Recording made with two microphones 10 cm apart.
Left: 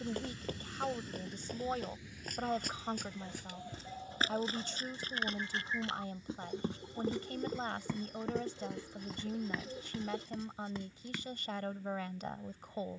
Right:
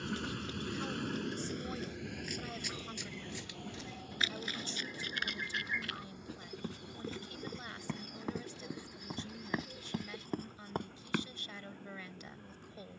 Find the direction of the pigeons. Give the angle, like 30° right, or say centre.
30° left.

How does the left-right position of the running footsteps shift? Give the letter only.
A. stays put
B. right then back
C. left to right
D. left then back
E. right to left
C.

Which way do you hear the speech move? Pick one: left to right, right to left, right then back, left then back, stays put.
stays put.